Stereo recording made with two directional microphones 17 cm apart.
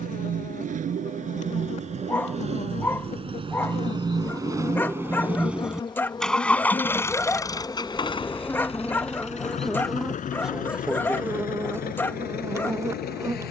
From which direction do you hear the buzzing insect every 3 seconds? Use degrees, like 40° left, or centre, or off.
40° left, 30° left, 20° left, centre, 20° right.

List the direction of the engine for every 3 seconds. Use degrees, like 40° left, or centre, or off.
40° right, 20° right, 20° left, 50° left, 60° left.